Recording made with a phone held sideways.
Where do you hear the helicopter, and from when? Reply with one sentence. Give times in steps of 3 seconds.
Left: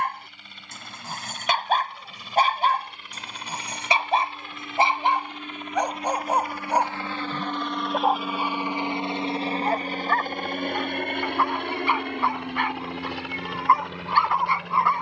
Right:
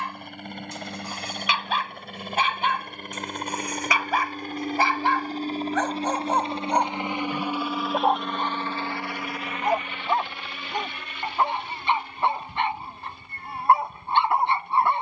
In this clip you hear the helicopter on the right from 0 s, in the centre from 6 s and on the left from 9 s.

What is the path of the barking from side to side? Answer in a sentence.
You can hear the barking move to the right.